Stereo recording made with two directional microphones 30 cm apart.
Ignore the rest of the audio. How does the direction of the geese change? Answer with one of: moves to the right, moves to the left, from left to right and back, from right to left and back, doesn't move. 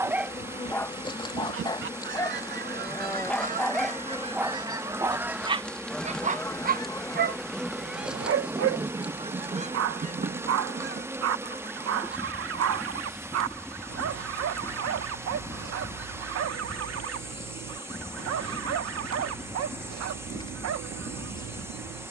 from right to left and back.